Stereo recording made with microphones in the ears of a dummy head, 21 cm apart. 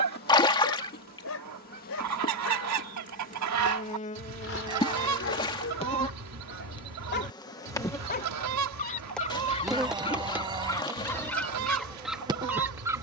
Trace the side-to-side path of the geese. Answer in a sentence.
You can hear the geese stay in one place.